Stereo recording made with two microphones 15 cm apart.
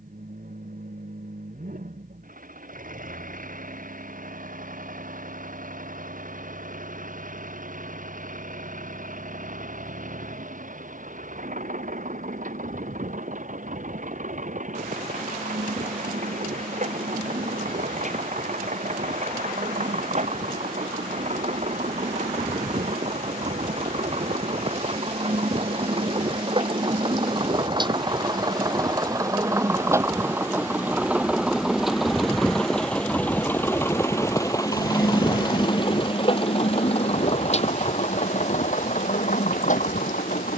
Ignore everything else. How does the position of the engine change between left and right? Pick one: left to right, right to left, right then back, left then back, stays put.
right to left.